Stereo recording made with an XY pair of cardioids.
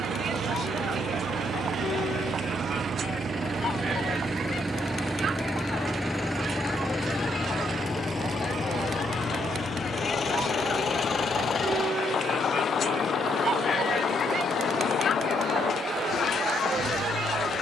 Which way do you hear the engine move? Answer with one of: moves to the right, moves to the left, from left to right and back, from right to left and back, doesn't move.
moves to the left.